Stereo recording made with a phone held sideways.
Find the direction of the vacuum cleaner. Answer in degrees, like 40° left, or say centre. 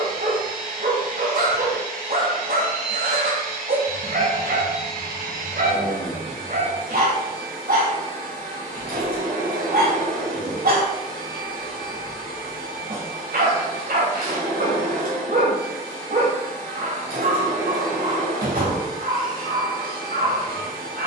80° right.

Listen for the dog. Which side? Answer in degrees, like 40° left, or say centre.
80° right.